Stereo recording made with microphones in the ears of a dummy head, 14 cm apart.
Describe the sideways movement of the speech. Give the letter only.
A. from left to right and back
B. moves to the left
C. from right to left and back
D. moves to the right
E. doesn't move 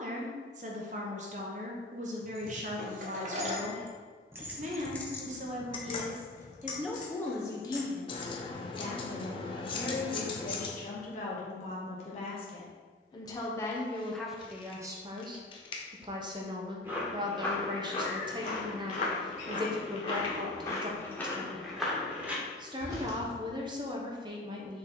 C.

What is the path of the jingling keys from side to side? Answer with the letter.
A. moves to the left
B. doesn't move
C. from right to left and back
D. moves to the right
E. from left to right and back
A.